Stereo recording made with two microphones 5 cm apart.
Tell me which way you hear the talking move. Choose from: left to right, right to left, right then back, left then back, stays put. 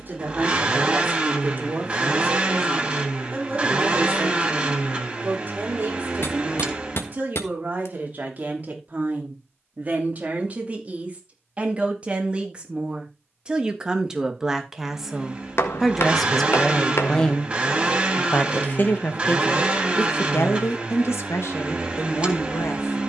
right to left.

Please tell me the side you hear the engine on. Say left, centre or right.
right.